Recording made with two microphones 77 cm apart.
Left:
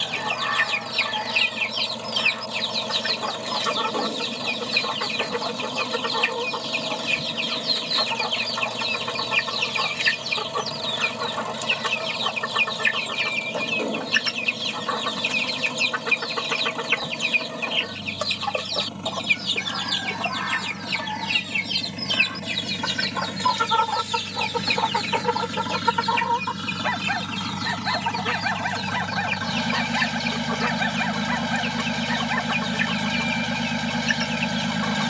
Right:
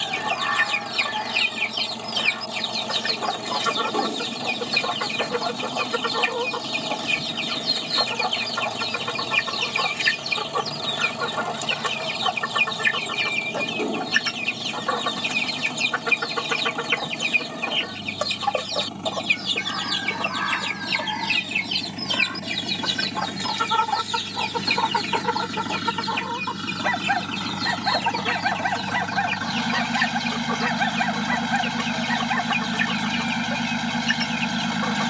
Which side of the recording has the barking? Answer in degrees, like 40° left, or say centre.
30° right.